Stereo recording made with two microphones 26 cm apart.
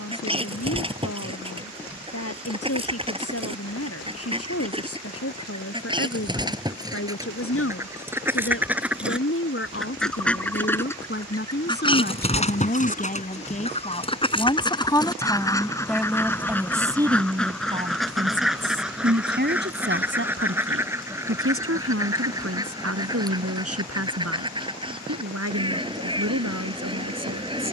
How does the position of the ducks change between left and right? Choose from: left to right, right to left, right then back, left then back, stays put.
left then back.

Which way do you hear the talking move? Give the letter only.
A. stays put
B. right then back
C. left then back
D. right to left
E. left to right
E.